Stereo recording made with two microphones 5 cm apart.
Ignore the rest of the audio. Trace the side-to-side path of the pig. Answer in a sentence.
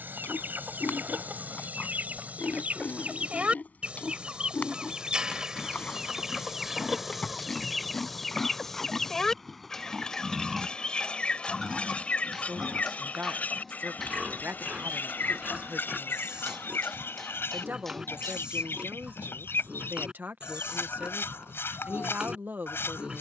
In this clip you hear the pig travel towards the right.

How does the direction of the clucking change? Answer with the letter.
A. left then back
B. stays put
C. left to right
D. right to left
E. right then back
D.